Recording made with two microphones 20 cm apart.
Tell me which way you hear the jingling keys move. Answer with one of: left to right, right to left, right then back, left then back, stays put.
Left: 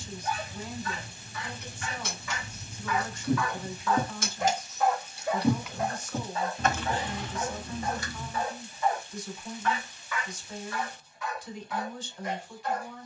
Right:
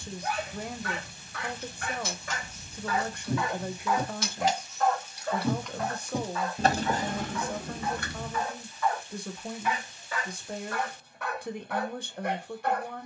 left to right.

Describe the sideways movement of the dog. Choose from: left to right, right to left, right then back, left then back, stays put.
left then back.